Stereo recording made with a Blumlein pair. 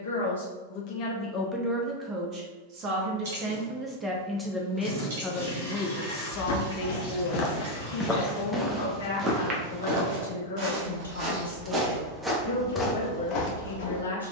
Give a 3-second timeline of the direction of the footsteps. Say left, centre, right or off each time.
off, off, left, right, left.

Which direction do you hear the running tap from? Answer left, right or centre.
right.